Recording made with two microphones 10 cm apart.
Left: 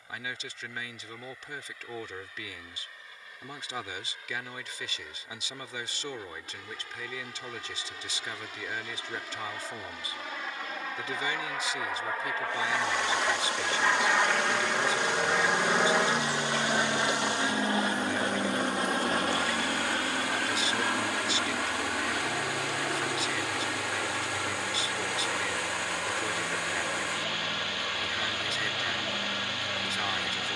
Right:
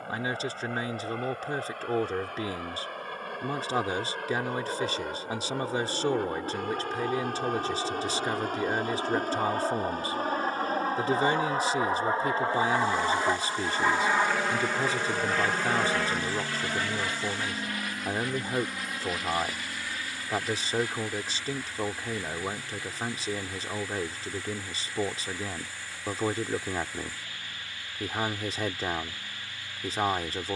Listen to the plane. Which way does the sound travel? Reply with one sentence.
In this clip you hear the plane travel towards the left.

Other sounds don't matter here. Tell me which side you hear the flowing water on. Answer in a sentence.
In this clip you hear the flowing water on the left.